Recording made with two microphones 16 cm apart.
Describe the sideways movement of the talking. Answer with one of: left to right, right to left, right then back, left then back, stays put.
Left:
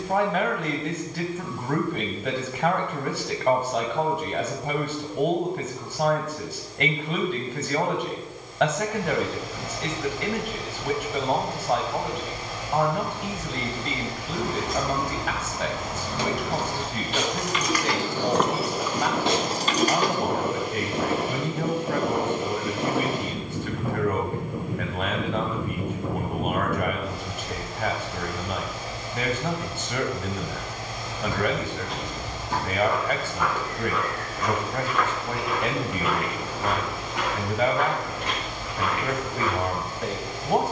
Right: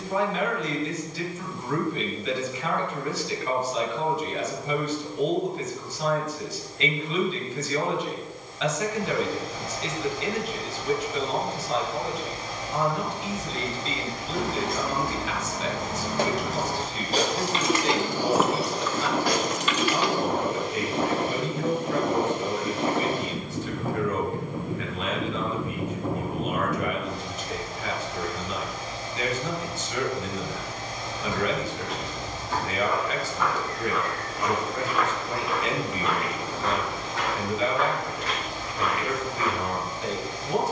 stays put.